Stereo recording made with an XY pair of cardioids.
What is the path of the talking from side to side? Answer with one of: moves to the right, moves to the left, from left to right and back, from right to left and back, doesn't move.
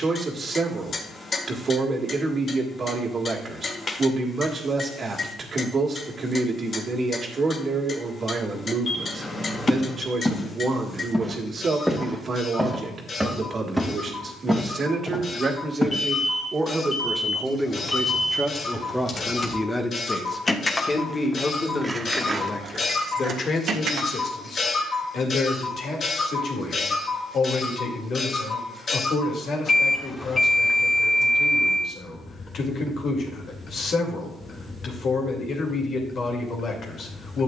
moves to the left.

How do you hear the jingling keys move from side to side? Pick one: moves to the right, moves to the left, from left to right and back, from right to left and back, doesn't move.
moves to the right.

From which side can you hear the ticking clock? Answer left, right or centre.
left.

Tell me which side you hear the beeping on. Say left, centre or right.
left.